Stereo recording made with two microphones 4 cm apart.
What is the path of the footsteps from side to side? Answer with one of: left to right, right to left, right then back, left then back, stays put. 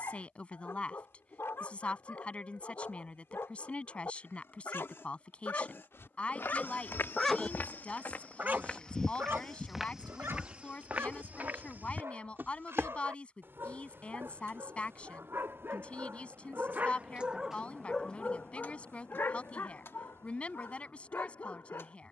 left to right.